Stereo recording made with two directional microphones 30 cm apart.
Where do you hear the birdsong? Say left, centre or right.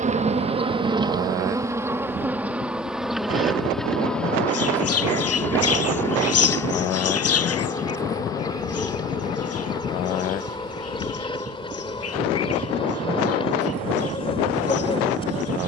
left.